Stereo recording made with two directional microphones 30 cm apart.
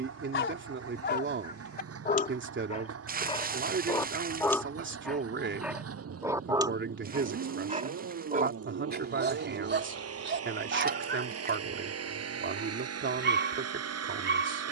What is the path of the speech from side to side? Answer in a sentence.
You can hear the speech stay put.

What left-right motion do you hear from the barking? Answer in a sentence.
You can hear the barking move to the right.